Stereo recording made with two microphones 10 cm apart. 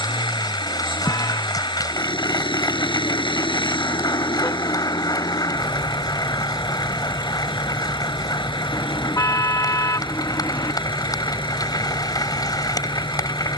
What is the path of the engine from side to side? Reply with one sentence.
In this clip you hear the engine stay in one place.